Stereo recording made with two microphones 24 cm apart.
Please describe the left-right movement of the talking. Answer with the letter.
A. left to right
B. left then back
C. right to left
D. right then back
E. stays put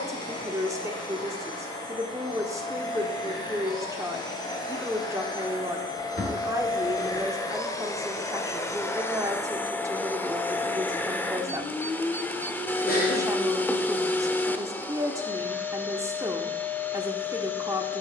E.